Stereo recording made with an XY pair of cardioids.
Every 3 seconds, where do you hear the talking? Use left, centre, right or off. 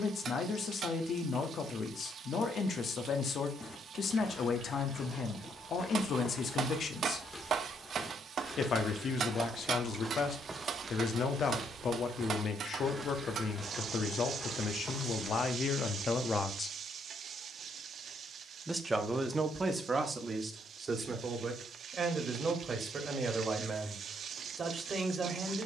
left, left, left, left, left, left, right, right, right.